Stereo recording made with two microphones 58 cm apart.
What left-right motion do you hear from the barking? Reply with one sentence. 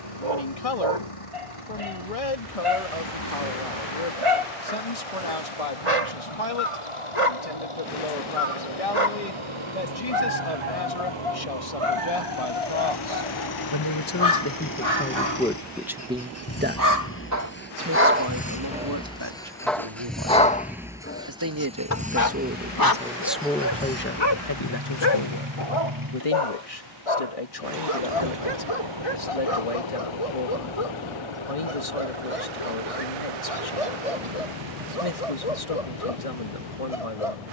You can hear the barking move to the left.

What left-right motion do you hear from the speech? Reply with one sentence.
In this clip you hear the speech move from left to right and back again.